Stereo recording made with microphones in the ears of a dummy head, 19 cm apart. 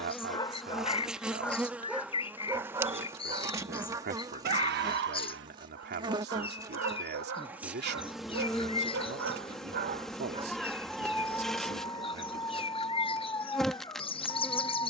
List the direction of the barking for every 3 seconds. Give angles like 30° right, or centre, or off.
centre, 50° right, 70° right, 30° right, 20° left.